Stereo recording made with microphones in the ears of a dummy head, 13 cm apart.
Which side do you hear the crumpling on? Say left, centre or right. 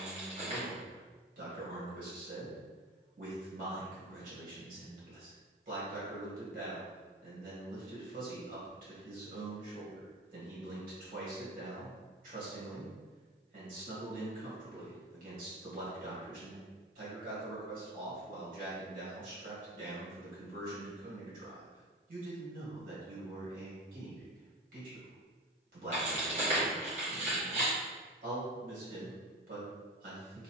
right.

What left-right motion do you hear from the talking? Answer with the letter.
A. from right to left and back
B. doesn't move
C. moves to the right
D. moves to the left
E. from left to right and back
B.